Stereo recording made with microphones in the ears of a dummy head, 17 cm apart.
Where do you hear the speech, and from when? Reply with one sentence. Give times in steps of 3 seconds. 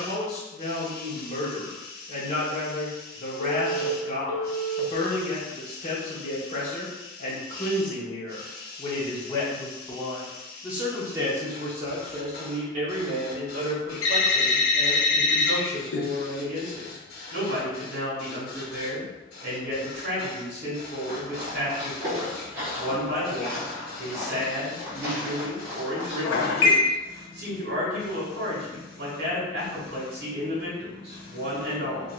You can hear the speech on the left from 0 s, in the centre from 9 s and on the right from 12 s.